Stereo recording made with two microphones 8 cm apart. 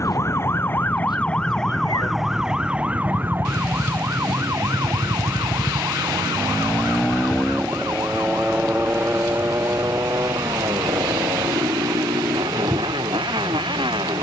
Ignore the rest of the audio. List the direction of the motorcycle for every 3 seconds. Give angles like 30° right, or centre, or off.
60° left, 50° left, centre, 40° right, 60° right.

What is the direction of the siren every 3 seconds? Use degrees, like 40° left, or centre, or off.
10° left, 40° right, 50° right, 60° right, 70° right.